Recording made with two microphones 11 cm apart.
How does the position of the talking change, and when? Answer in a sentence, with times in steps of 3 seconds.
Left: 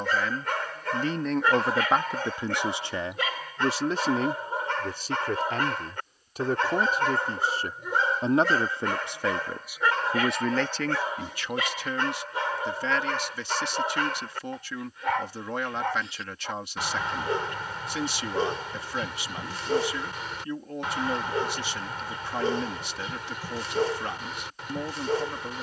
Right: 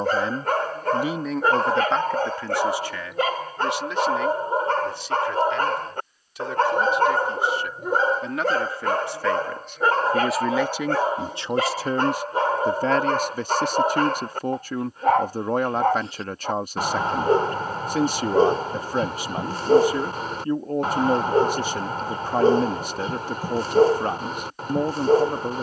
In this clip you hear the talking in the centre from 0 s, on the left from 3 s, in the centre from 9 s and on the right from 12 s.